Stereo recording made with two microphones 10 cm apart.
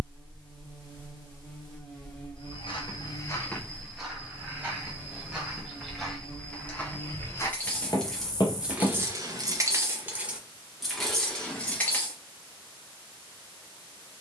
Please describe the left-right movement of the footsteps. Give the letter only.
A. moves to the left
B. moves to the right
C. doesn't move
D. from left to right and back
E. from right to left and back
D.